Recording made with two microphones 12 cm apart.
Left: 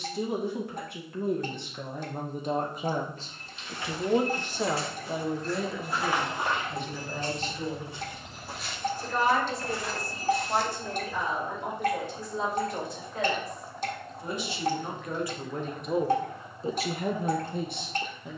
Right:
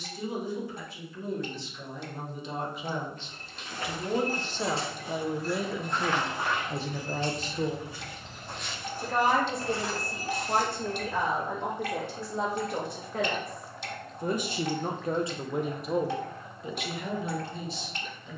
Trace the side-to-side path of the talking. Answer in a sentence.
In this clip you hear the talking go right and come back.